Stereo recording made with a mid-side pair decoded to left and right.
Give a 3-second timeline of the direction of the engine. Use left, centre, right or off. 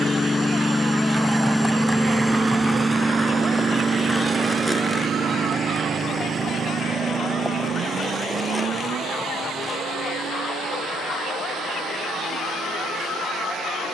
centre, right, right, right, right.